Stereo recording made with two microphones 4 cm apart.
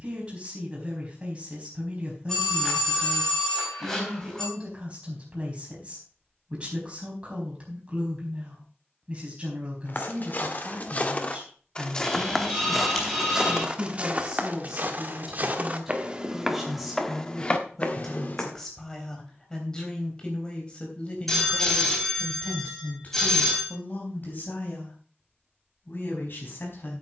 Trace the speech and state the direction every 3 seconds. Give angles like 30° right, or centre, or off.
30° right, 30° right, 30° right, 30° right, 20° right, centre, 20° left, 40° left, 50° left.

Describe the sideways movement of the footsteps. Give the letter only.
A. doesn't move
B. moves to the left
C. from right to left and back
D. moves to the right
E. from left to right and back
E.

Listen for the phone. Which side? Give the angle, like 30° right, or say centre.
10° left.